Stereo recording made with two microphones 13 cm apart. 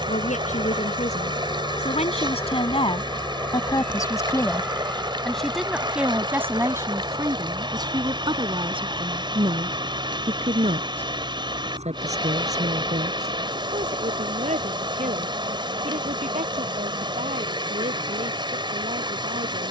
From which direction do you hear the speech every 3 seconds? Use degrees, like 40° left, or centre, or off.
60° left, 20° left, 30° right, 50° right, 60° right, 60° right, 70° right.